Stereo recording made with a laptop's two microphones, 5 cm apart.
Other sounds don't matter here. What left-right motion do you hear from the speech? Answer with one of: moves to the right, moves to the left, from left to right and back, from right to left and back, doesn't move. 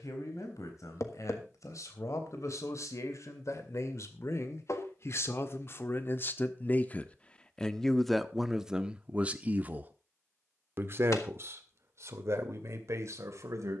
moves to the right.